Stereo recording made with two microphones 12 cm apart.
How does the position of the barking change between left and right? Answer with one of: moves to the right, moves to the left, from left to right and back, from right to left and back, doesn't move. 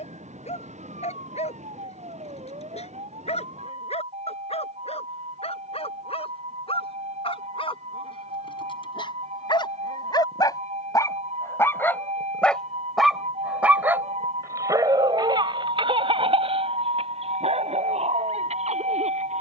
moves to the right.